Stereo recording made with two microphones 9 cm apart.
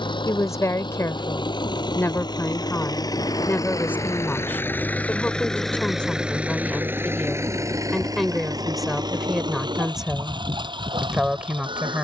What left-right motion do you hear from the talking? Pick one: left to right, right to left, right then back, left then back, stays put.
left to right.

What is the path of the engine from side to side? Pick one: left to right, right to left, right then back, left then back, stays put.
left to right.